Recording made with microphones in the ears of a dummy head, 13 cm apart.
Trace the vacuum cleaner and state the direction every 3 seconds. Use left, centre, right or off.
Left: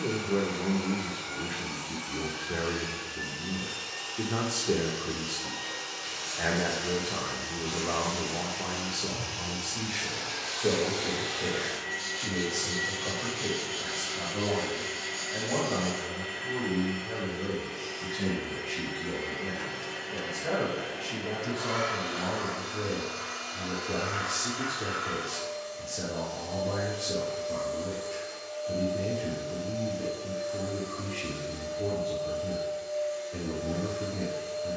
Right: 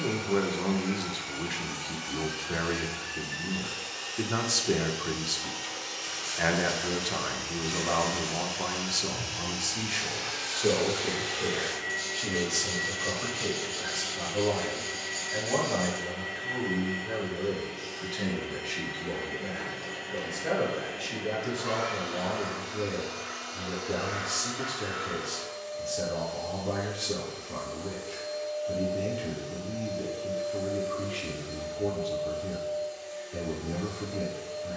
right, right, right, right, centre, centre, centre, centre, centre, centre, centre, centre.